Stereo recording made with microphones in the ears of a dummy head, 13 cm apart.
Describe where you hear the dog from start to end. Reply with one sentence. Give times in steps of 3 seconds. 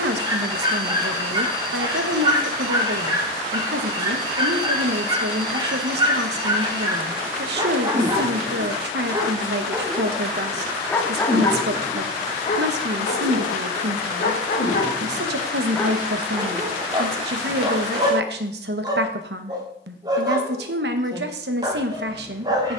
In this clip you hear the dog on the right from 0 s, in the centre from 9 s, on the left from 12 s, in the centre from 15 s and on the right from 18 s.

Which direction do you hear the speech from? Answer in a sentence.
In this clip you hear the speech on the right.